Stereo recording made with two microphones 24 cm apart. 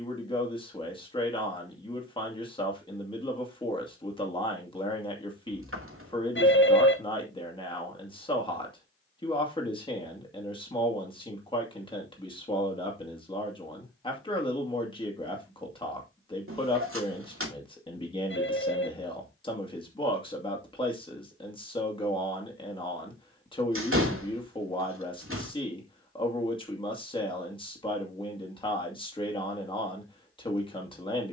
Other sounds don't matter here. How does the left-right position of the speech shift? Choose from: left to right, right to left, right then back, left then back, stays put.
stays put.